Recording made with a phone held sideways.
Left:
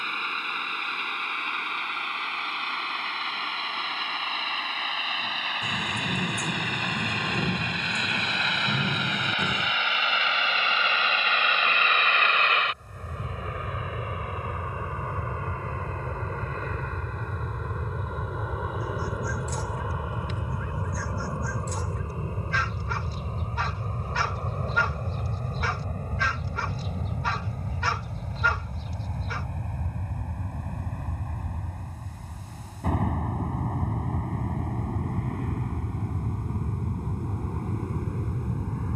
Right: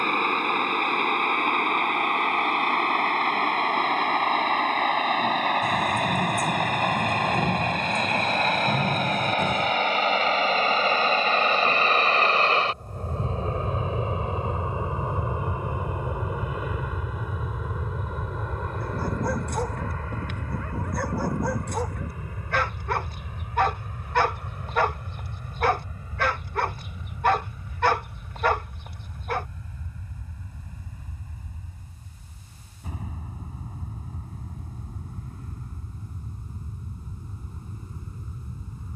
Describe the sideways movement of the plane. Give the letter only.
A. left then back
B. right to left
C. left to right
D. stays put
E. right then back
B.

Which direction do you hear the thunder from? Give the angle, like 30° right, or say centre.
centre.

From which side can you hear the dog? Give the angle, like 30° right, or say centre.
60° right.